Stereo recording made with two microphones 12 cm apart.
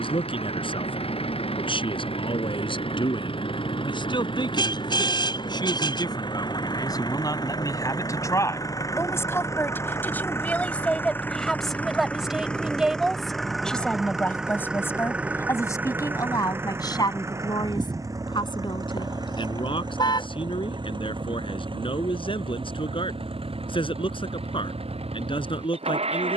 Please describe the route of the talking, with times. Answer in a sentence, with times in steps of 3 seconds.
In this clip you hear the talking on the left from 0 s, in the centre from 9 s and on the left from 15 s.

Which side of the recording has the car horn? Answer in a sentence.
You can hear the car horn on the left.